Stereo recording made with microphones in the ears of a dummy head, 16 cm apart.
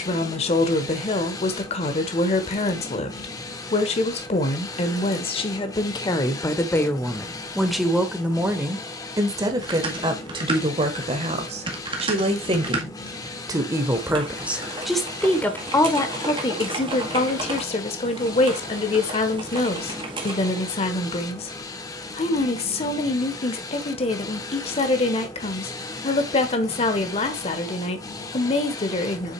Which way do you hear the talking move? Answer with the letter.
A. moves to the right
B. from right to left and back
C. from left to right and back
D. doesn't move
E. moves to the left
C.